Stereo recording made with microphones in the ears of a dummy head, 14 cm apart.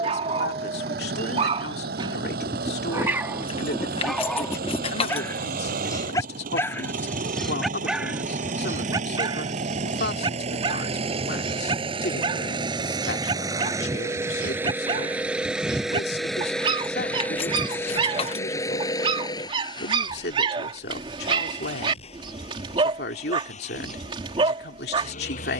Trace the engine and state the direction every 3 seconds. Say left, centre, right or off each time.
right, right, right, right, right, centre, left, left, left.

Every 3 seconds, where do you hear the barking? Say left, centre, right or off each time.
right, centre, centre, right, right, right, right, right, right.